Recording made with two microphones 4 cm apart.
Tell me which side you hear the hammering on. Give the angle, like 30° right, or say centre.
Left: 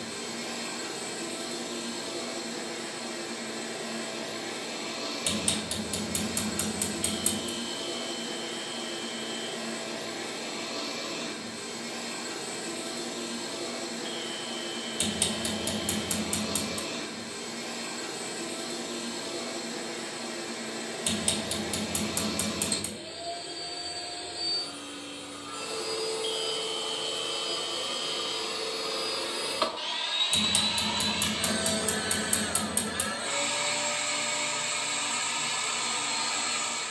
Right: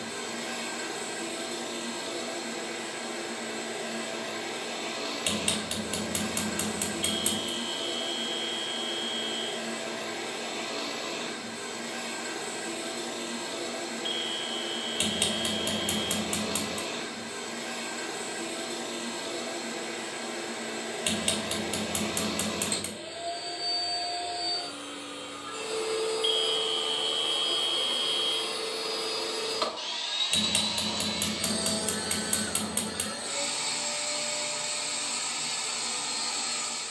50° right.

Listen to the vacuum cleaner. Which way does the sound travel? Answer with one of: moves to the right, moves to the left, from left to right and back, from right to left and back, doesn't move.
moves to the left.